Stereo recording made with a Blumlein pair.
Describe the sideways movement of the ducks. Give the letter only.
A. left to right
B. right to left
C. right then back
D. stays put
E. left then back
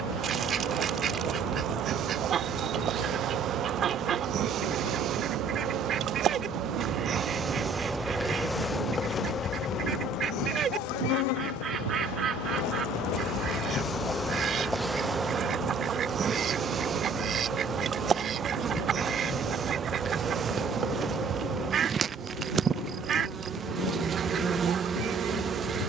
D.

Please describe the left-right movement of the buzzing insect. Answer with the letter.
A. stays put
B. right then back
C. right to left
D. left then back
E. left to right
D.